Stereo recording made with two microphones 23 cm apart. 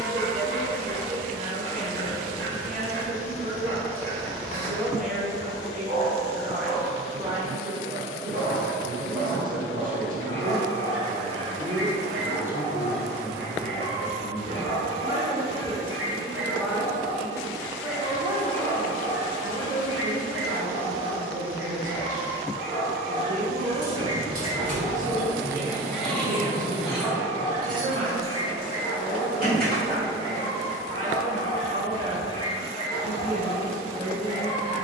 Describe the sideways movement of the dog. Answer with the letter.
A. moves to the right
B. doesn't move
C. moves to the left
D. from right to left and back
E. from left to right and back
C.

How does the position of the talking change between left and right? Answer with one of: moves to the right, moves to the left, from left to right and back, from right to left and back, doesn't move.
from right to left and back.